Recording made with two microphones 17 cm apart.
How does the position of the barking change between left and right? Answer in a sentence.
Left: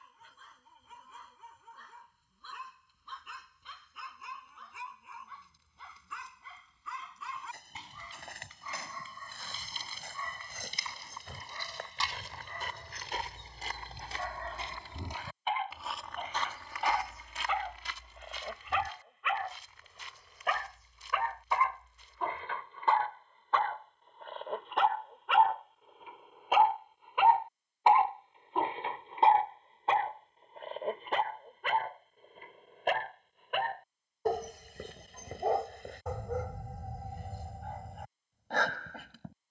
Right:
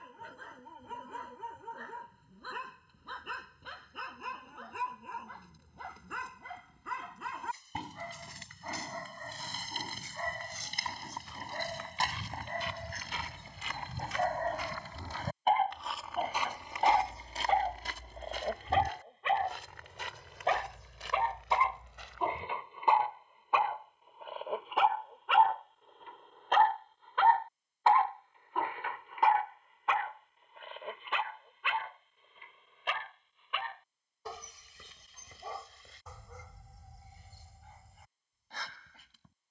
You can hear the barking move to the left.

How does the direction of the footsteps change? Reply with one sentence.
In this clip you hear the footsteps travel towards the right.